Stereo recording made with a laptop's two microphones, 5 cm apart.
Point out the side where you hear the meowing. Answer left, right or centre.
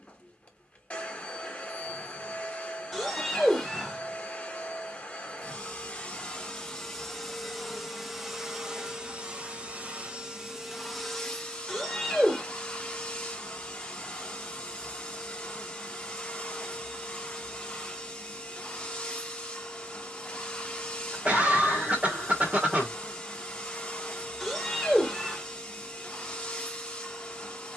centre.